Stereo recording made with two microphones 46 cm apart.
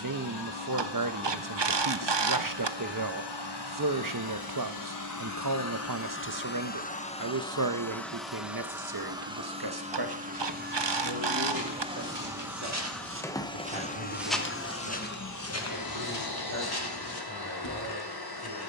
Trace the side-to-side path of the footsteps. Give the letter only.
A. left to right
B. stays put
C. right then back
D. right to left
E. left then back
D.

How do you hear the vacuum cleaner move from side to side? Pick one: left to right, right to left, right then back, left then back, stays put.
right then back.